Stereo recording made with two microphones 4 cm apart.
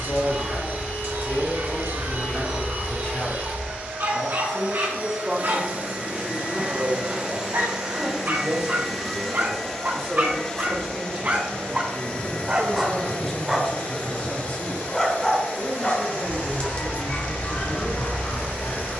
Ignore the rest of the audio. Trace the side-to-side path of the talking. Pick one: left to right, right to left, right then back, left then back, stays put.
right then back.